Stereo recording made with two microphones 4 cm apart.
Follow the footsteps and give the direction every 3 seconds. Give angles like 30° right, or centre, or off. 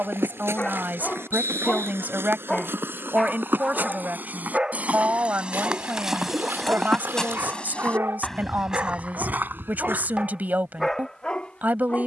60° right, 40° right, 10° left, 50° right.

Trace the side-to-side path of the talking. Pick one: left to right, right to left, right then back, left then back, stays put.
stays put.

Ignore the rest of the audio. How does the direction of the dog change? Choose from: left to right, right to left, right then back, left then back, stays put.
right then back.